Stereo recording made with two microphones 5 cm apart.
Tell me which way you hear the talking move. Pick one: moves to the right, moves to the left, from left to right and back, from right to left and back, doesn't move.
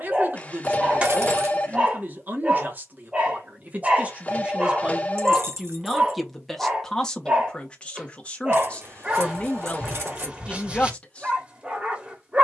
moves to the left.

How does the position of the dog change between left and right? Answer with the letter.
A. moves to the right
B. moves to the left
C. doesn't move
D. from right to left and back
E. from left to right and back
C.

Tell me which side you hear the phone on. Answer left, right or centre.
left.